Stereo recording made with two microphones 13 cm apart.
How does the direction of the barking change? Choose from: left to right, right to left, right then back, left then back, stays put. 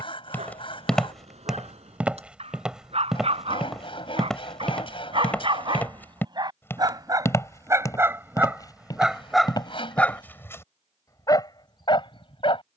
right to left.